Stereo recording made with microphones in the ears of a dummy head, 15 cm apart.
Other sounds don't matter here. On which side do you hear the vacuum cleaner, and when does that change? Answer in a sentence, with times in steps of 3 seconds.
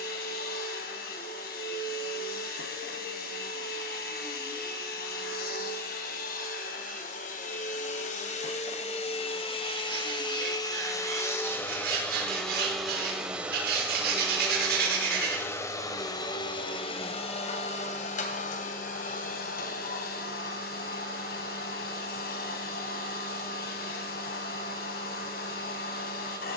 In this clip you hear the vacuum cleaner on the left from 0 s, in the centre from 12 s and on the left from 15 s.